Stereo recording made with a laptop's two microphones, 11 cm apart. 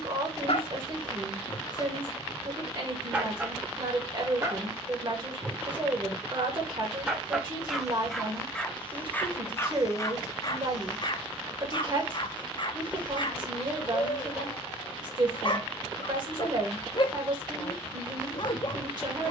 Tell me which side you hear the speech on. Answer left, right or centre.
right.